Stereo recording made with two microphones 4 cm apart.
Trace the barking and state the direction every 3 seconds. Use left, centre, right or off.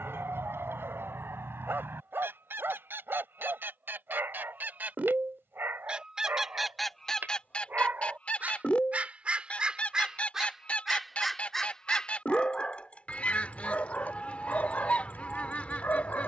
right, right, right, centre, left, left.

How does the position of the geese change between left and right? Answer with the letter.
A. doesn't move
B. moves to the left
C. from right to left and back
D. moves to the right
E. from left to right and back
B.